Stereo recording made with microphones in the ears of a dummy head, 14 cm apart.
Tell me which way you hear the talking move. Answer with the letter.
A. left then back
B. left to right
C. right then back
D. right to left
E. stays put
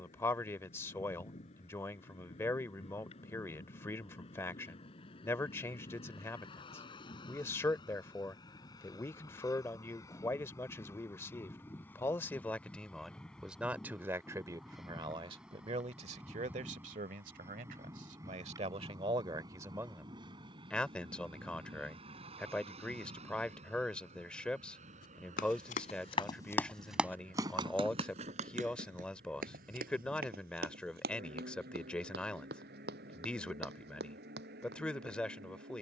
C.